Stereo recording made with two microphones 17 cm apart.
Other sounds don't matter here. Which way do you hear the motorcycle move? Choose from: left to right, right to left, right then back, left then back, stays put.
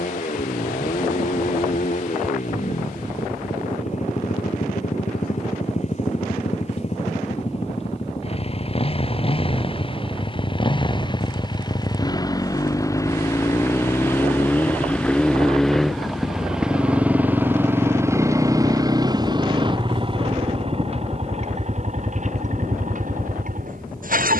left to right.